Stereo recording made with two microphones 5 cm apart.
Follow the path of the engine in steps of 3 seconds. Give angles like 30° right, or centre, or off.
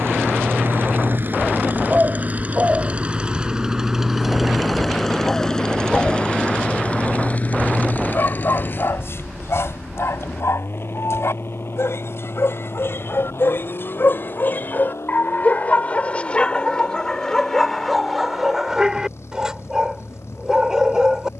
40° right, centre, 30° left, 50° left, 60° left, 70° left, 70° left.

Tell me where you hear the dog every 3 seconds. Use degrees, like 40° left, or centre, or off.
30° right, 10° right, 40° left, 70° left, 50° left, 20° left, 10° right.